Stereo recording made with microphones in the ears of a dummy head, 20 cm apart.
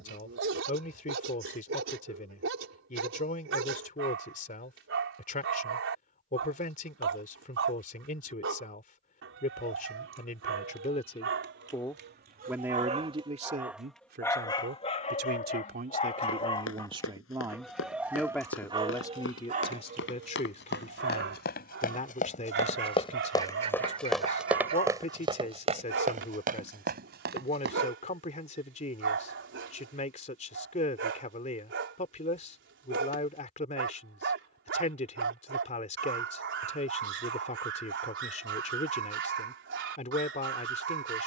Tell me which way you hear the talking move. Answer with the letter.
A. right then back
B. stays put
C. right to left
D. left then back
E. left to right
A.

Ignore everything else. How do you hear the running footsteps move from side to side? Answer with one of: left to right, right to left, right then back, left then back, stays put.
left to right.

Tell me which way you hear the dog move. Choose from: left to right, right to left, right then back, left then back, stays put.
left then back.